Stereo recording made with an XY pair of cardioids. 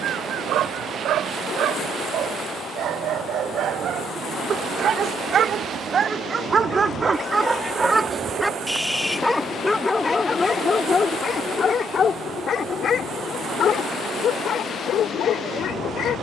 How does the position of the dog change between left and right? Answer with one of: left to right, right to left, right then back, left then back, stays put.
right to left.